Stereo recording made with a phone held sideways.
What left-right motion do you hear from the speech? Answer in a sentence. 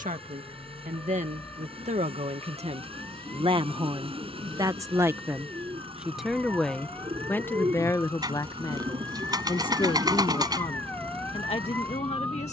You can hear the speech move from right to left.